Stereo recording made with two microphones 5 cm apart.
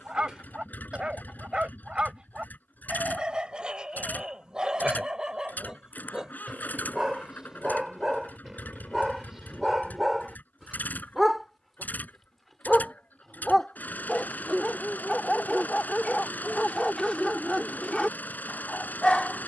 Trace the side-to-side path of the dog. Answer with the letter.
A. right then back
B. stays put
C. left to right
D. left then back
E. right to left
E.